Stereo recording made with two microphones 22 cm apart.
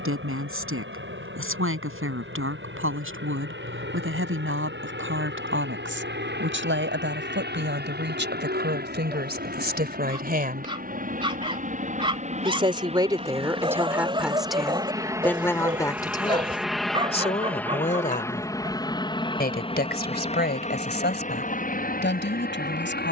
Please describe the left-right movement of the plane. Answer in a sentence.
In this clip you hear the plane go from the right side to the left.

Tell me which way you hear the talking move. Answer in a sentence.
You can hear the talking go from the right side to the left.